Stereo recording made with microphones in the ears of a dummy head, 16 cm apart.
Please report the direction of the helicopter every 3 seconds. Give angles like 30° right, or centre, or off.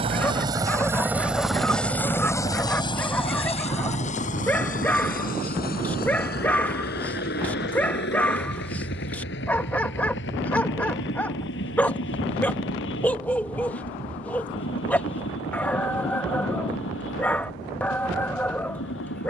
centre, 40° left, 60° left, 70° left, 70° left, 70° left, 70° left.